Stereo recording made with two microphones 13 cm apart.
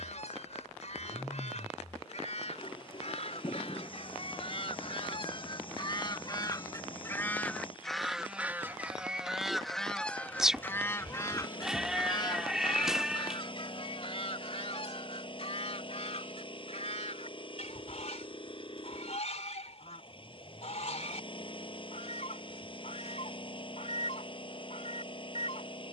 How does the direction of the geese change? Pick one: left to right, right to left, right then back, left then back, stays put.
right then back.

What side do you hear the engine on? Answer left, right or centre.
left.